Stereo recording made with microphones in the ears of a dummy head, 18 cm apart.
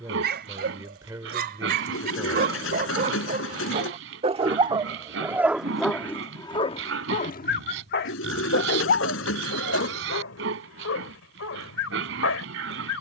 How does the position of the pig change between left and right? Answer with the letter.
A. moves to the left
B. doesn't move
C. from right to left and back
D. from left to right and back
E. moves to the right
B.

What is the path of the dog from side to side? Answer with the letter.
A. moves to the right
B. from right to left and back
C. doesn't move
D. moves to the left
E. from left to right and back
D.